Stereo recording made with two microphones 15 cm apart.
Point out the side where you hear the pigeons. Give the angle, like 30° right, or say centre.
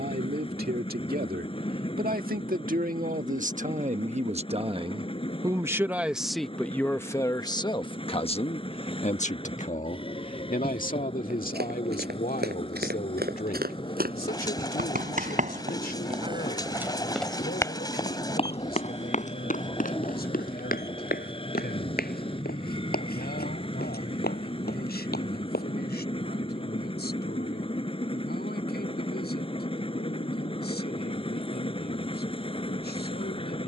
20° left.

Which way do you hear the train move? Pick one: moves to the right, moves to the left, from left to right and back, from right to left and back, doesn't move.
doesn't move.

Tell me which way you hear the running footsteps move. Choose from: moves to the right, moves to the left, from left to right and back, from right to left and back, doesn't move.
moves to the left.